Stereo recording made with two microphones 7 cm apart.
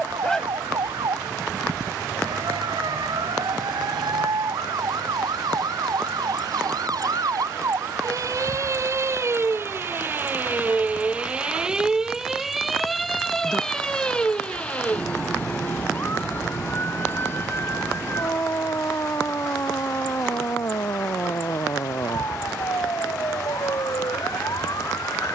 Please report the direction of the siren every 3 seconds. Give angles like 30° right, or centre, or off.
80° right, 70° right, 50° right, 20° right, 10° left, 30° left, 40° left, 50° left, 50° left.